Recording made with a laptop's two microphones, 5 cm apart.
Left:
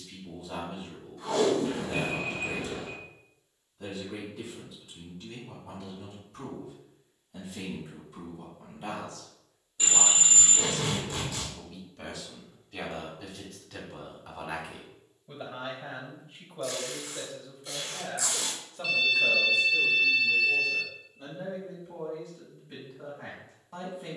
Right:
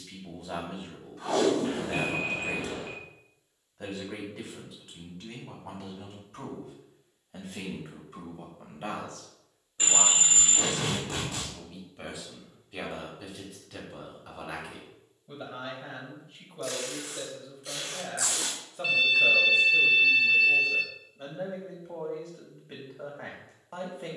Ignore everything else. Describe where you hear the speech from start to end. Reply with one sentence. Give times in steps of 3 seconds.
You can hear the speech on the right from 0 s, in the centre from 12 s and on the right from 18 s.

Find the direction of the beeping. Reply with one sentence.
You can hear the beeping on the right.